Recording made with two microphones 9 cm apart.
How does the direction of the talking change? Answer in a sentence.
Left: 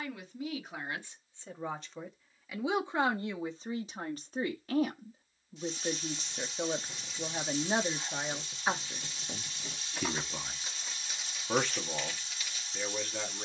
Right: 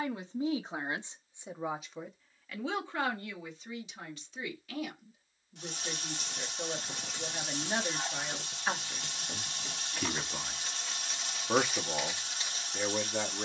In this clip you hear the talking move from right to left and back again.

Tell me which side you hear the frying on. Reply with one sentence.
In this clip you hear the frying on the right.